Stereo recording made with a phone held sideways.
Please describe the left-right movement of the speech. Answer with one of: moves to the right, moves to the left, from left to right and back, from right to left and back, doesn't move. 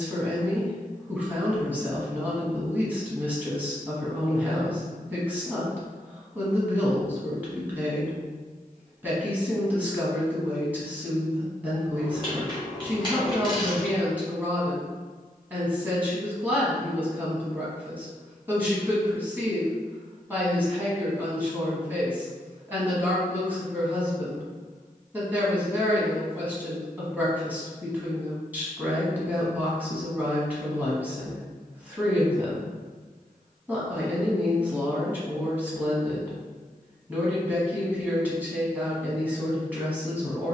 doesn't move.